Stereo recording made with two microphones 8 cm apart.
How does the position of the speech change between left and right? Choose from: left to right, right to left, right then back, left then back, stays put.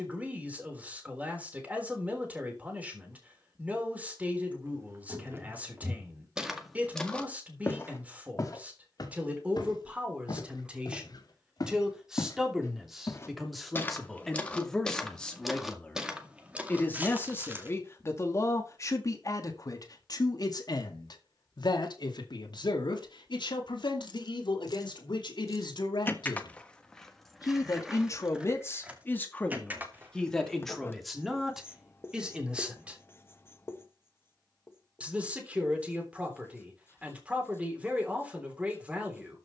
left then back.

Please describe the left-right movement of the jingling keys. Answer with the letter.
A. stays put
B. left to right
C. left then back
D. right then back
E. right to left
B.